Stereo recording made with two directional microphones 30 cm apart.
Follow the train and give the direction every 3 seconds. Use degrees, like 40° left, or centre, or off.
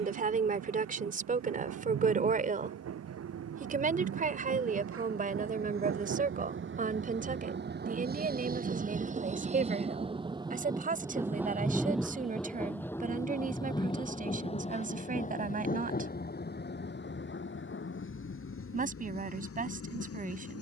60° right, 50° right, 40° right, 10° right, 10° left, 30° left, 50° left.